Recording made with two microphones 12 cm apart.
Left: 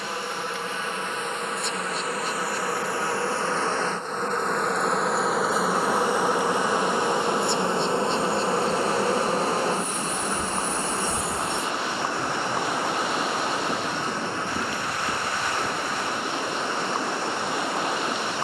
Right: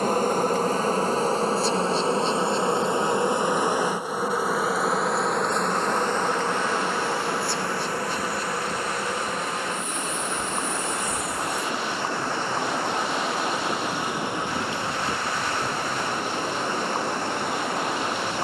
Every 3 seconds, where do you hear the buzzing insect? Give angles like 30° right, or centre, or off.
30° right, 10° right, 20° left, 30° left, centre, 40° right.